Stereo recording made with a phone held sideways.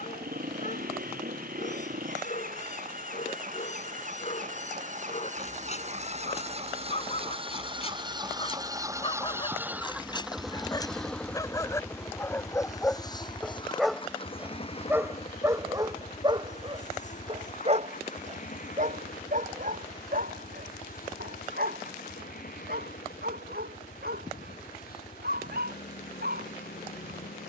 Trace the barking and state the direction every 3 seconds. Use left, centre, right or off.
left, left, left, left, centre, right, right, right, right.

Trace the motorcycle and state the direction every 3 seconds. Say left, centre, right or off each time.
right, right, right, centre, left, left, left, left, left.